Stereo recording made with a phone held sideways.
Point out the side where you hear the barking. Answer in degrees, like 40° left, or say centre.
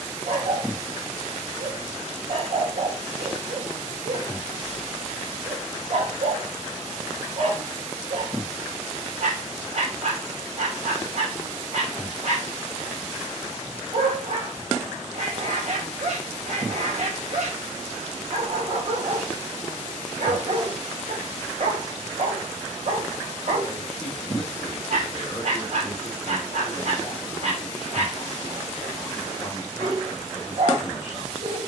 60° right.